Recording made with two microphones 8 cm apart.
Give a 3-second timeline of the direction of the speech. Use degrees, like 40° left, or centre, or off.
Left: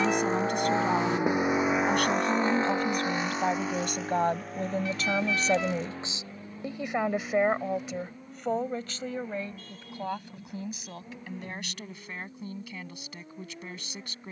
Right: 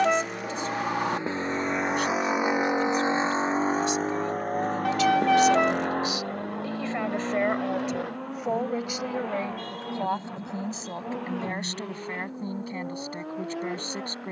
70° left, 50° left, 10° left, 30° right, 40° right.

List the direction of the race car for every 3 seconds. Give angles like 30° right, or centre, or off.
10° left, 50° right, 70° right, 70° right, 80° right.